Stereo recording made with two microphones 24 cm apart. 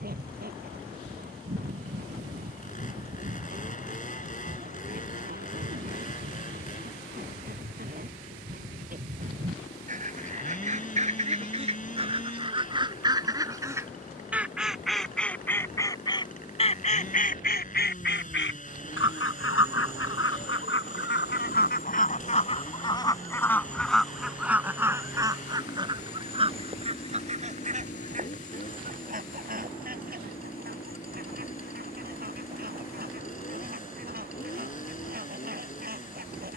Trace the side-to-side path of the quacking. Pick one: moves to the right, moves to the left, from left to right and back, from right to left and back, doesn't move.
from right to left and back.